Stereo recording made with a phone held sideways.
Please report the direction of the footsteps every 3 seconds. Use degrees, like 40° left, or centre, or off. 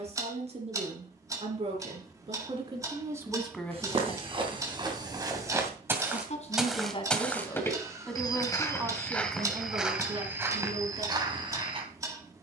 off, 30° right, 10° left, 20° right.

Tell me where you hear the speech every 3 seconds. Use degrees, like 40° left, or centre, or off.
40° right, 10° left, 20° left, 30° right.